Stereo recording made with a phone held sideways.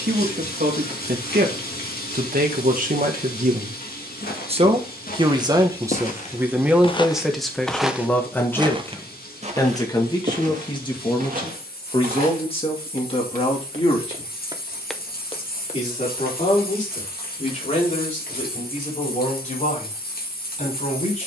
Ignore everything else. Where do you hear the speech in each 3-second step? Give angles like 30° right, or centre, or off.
70° right, 40° right, centre, 30° left, 40° left, 50° left, 50° left.